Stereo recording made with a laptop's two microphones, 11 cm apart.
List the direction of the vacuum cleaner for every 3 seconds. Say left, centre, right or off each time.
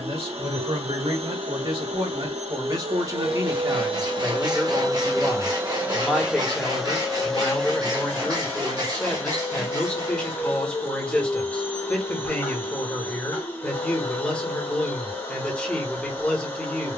right, right, centre, left, left, left.